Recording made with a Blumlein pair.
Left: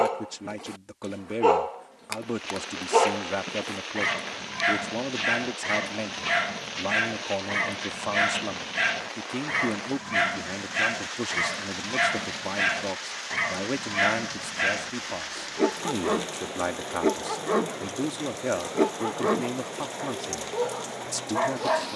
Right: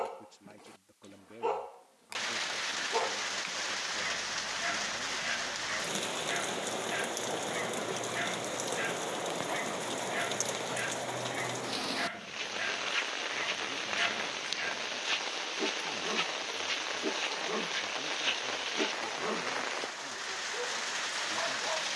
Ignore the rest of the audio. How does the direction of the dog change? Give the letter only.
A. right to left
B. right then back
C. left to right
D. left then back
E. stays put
E.